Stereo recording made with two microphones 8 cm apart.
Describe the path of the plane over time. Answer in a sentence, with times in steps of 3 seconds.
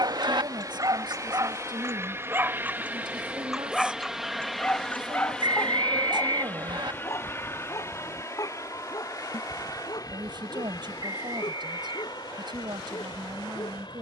In this clip you hear the plane on the right from 0 s, in the centre from 3 s and on the left from 6 s.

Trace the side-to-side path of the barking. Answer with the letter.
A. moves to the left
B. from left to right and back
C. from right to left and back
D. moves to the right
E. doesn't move
A.